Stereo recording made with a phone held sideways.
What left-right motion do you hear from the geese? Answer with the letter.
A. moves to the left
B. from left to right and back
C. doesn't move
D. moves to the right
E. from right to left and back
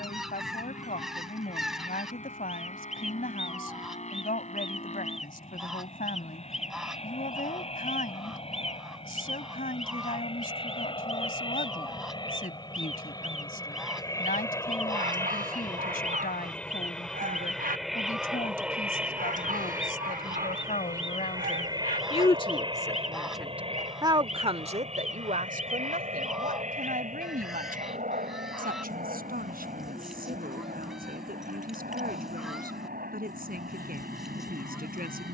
C.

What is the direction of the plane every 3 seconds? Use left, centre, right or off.
left, left, left, left, left, centre, centre, right, right, right, right, right.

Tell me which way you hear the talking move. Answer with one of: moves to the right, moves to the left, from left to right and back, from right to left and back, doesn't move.
moves to the right.